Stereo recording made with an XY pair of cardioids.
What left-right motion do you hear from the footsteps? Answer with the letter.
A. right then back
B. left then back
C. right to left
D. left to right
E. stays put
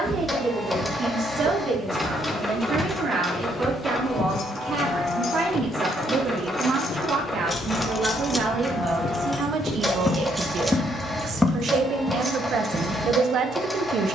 B.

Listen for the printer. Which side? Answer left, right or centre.
centre.